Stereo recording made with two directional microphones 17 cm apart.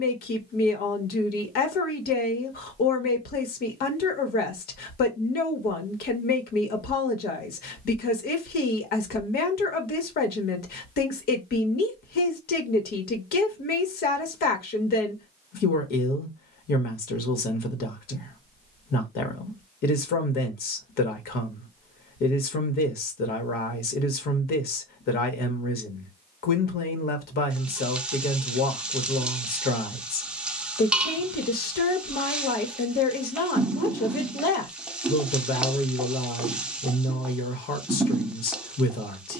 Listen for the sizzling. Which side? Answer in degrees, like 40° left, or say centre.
10° right.